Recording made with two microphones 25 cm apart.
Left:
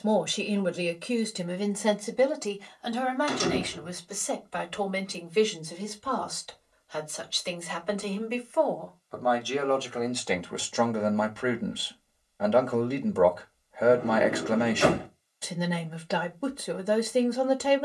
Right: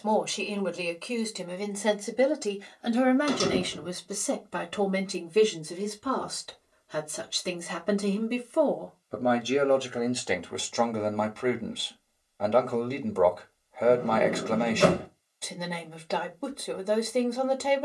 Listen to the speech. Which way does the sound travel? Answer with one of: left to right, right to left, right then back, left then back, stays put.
right then back.